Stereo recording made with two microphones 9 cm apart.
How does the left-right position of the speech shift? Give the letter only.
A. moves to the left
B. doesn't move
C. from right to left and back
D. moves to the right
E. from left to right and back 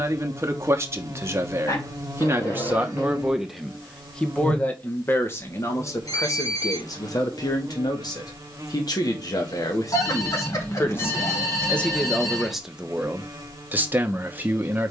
C.